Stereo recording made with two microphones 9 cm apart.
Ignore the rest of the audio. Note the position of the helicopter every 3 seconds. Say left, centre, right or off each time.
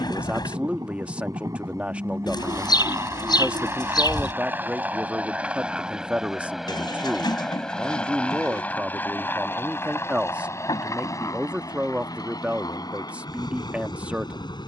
right, right, centre, left, left.